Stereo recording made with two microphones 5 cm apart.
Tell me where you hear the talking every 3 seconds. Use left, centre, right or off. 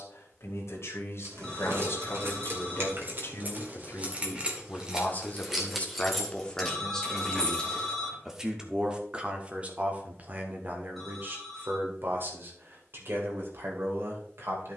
left, left, centre, right, right.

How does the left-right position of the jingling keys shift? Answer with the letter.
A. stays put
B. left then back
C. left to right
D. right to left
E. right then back
D.